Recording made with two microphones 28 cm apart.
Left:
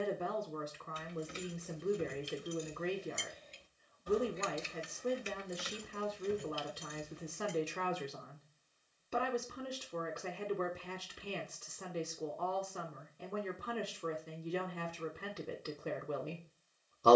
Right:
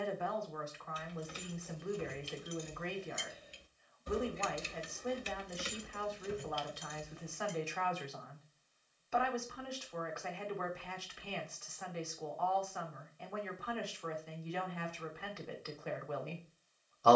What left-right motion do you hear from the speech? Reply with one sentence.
You can hear the speech stay put.